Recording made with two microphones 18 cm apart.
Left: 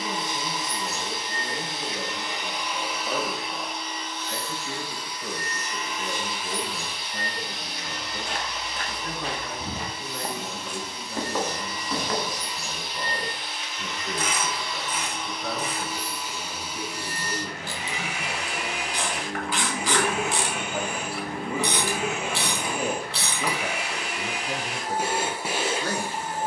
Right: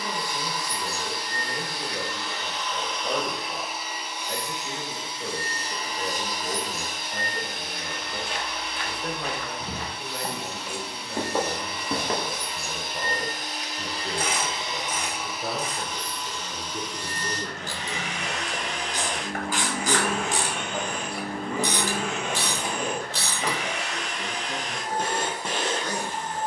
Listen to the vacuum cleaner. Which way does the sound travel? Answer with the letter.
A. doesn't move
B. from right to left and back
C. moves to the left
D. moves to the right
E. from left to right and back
E.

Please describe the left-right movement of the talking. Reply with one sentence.
In this clip you hear the talking travel towards the left.